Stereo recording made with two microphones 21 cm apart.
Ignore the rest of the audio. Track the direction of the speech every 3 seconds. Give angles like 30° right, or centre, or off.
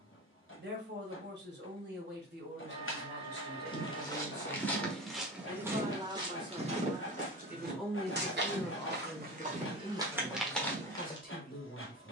50° right, 40° right, 10° right, 30° left.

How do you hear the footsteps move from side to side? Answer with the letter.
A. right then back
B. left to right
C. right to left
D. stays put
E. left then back
A.